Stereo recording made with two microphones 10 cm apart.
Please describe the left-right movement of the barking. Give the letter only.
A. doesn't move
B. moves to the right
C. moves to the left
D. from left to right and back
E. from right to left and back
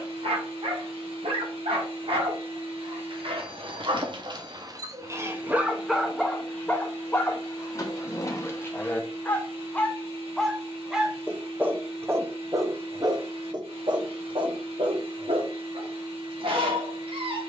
E.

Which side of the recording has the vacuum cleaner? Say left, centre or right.
right.